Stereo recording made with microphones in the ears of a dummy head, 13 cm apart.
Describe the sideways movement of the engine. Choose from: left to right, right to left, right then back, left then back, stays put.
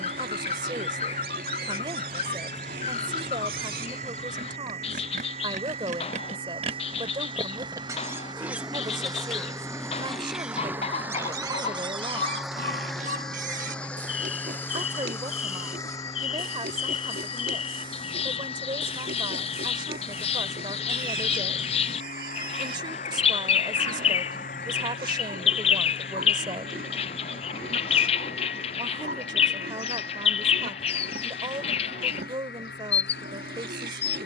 right to left.